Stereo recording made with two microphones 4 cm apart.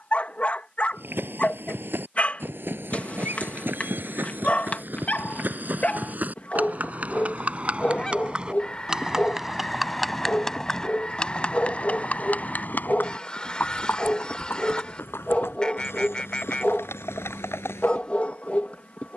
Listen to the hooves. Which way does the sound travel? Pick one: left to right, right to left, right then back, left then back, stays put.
right to left.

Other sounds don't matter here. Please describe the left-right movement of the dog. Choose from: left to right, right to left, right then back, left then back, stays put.
stays put.